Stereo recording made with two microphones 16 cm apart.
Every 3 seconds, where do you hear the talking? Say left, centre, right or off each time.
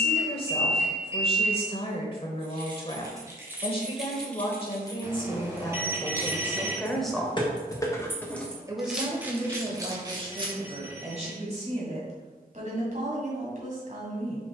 left, left, centre, right, right.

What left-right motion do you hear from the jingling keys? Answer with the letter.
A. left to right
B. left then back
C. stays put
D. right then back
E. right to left
B.